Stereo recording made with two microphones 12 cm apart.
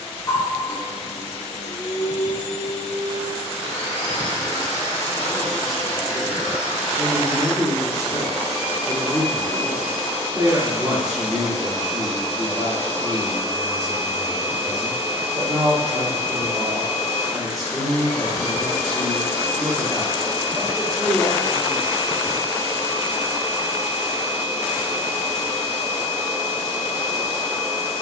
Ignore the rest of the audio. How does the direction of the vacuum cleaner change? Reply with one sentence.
You can hear the vacuum cleaner go right and come back.